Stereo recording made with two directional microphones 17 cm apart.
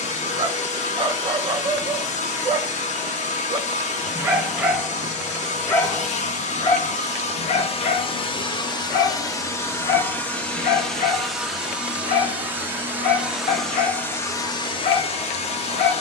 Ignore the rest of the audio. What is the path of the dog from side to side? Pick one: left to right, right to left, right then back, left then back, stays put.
right to left.